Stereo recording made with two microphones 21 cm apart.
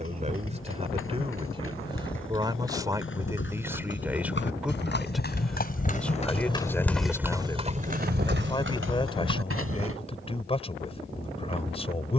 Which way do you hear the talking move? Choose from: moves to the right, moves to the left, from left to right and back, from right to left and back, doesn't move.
moves to the left.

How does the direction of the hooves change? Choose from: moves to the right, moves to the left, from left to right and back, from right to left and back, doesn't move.
moves to the right.